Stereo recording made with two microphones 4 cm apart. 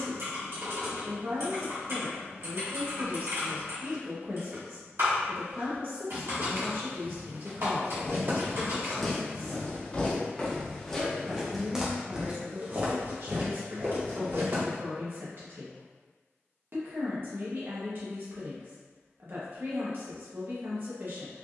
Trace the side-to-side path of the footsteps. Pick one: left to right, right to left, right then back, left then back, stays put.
left then back.